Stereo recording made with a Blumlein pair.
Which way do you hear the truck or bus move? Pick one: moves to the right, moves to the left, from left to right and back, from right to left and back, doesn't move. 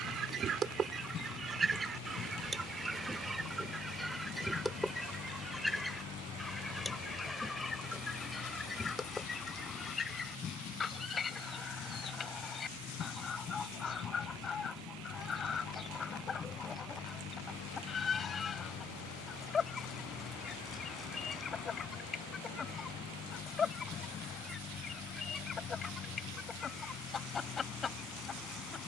doesn't move.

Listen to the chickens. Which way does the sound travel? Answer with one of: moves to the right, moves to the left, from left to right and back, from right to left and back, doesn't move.
moves to the left.